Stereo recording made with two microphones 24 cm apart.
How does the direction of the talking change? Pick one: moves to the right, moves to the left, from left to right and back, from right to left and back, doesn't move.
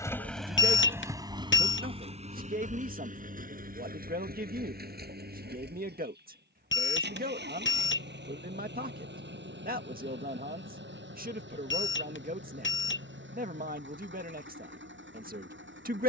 doesn't move.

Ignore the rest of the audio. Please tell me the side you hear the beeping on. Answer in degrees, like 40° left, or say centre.
50° left.